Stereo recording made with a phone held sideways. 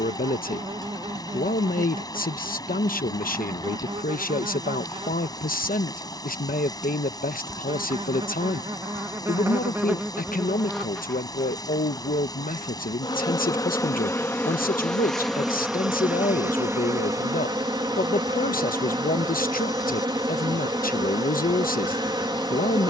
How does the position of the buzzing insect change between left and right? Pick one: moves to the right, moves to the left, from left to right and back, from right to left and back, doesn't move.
from right to left and back.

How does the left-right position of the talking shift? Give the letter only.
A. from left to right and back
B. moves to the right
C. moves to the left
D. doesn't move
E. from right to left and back
D.